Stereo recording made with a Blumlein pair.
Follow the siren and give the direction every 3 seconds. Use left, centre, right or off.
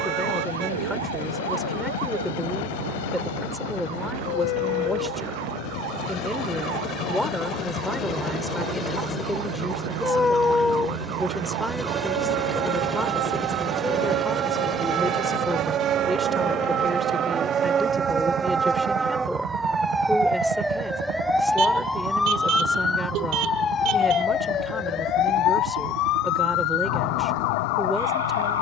right, right, right, right, right, right, centre, centre, left, left.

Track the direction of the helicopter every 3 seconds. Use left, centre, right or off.
left, left, left, centre, centre, right, right, right, right, right.